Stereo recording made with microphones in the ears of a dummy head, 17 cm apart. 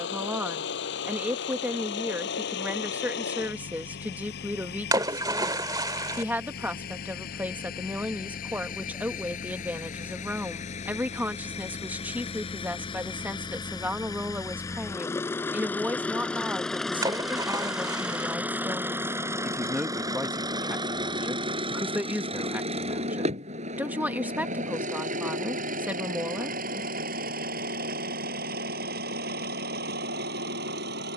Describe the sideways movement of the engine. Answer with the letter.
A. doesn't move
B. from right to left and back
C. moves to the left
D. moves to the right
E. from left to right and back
D.